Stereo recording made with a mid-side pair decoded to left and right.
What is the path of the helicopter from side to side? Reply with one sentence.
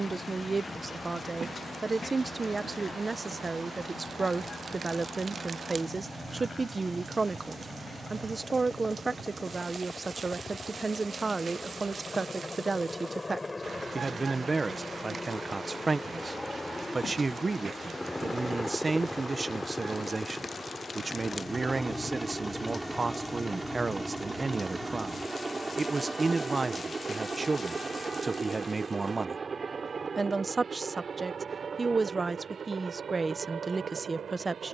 In this clip you hear the helicopter travel towards the right.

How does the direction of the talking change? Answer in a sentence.
You can hear the talking stay put.